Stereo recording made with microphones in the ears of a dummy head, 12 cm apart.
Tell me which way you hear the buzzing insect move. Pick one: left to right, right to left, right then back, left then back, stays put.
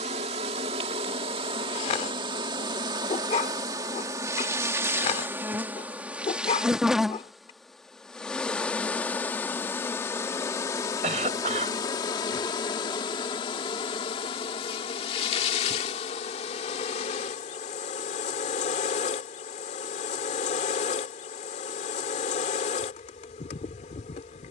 right to left.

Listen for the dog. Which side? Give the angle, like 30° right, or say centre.
50° left.